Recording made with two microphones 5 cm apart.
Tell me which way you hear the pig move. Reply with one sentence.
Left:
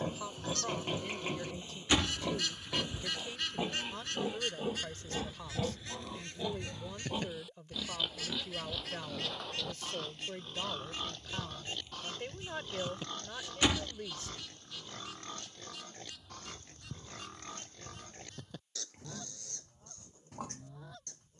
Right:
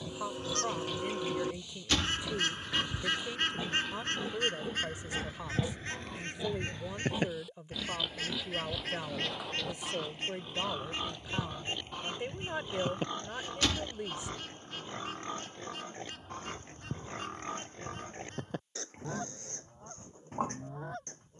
You can hear the pig move to the right.